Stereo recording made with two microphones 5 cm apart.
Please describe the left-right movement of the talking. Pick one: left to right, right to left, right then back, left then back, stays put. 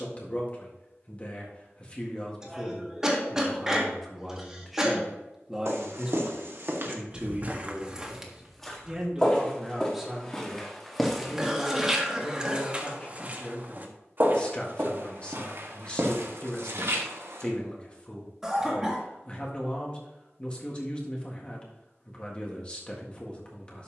right then back.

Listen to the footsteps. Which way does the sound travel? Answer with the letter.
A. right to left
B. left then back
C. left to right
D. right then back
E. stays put
B.